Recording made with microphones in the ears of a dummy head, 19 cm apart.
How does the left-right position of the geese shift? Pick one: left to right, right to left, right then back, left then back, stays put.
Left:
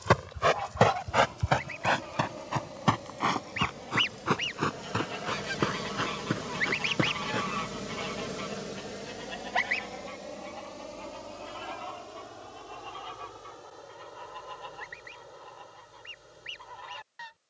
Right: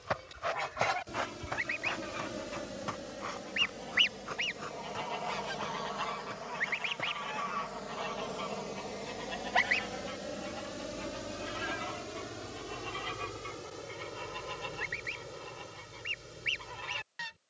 left then back.